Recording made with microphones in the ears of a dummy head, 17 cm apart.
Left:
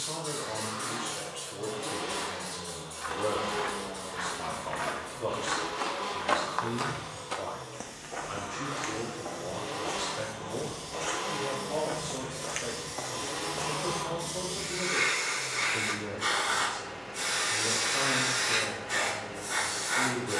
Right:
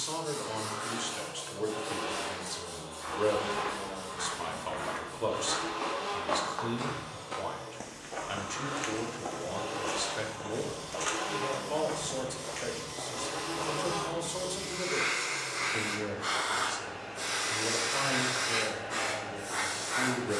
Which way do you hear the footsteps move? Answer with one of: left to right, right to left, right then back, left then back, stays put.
right then back.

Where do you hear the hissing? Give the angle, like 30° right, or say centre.
60° left.